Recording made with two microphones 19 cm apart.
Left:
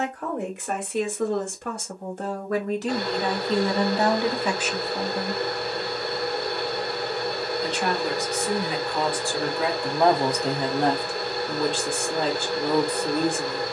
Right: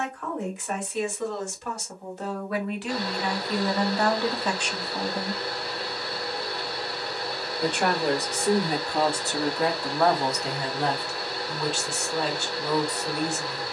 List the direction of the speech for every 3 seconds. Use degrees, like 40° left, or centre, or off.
60° left, 20° left, 50° right, 30° left, 60° left.